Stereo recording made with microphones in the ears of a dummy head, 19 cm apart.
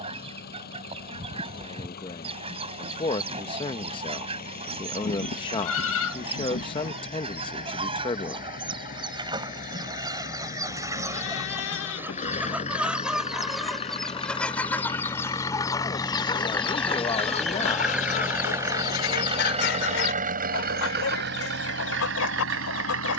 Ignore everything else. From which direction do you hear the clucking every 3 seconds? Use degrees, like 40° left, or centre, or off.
30° right, 30° right, 30° right, 20° right, centre, 20° left, 50° left, 70° left.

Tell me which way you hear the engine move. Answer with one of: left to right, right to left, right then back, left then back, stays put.
left to right.